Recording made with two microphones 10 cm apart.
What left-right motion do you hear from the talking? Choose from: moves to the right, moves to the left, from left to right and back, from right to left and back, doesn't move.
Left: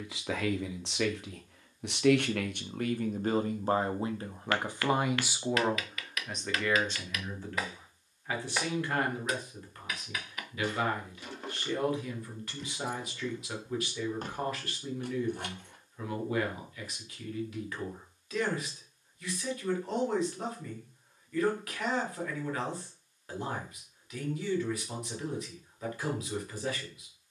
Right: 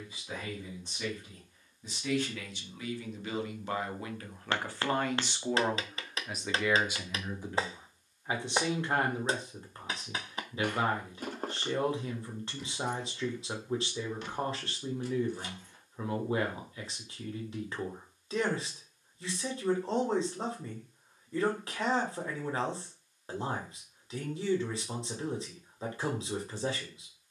moves to the right.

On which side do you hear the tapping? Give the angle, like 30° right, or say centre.
30° right.